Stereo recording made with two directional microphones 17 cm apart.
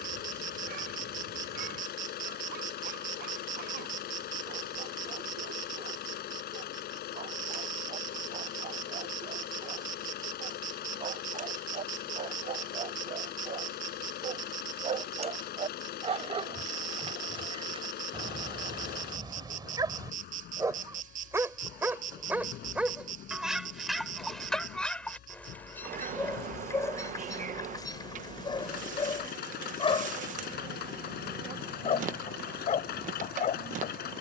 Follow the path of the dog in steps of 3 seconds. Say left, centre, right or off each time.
right, right, right, right, right, right, right, centre, centre, left, left, left.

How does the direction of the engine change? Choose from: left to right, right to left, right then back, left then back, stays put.
stays put.